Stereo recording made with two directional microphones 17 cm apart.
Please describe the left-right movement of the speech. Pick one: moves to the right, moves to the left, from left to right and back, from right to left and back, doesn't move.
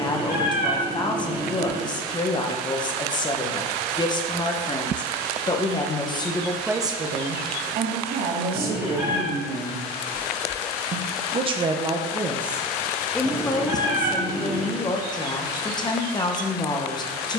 from left to right and back.